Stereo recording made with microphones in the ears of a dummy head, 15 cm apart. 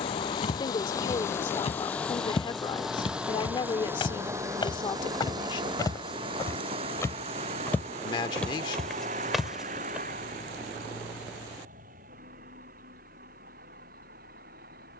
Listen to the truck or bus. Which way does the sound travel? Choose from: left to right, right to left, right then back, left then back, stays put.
left to right.